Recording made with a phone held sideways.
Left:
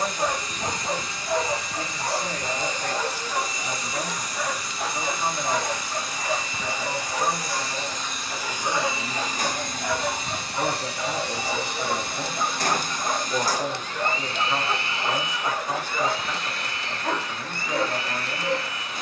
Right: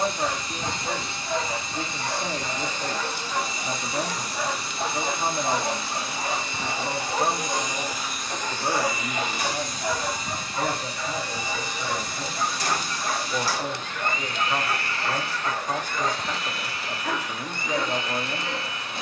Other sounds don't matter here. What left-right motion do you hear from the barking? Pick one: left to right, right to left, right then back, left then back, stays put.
right then back.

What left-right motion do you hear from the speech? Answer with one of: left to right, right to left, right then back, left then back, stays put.
left then back.